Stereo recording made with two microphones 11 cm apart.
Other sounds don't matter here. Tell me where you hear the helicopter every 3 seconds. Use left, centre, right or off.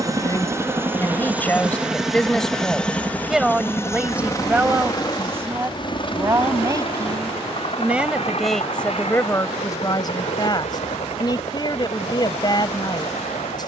centre, left, left, left, left.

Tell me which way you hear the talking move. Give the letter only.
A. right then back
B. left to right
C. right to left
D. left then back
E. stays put
A.